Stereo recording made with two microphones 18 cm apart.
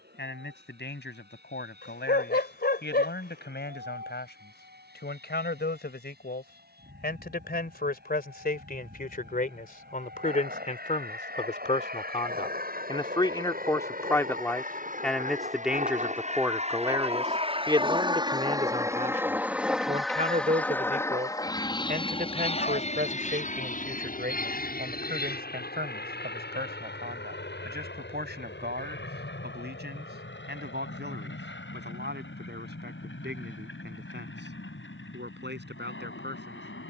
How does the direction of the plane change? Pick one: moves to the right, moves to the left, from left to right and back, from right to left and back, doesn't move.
moves to the left.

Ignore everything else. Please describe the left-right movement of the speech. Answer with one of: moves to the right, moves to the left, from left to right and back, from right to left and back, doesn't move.
moves to the right.